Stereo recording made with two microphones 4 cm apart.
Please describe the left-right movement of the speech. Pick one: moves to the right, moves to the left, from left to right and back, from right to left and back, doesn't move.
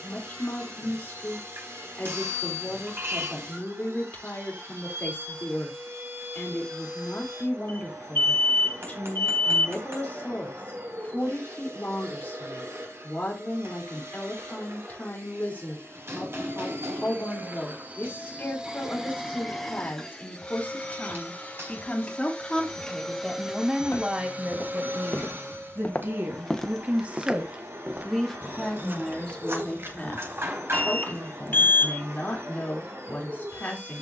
from left to right and back.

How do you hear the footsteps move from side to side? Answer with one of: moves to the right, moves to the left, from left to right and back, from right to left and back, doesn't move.
moves to the right.